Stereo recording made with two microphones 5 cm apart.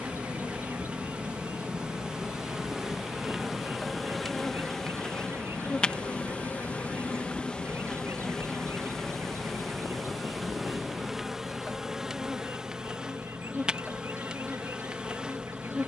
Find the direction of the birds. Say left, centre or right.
right.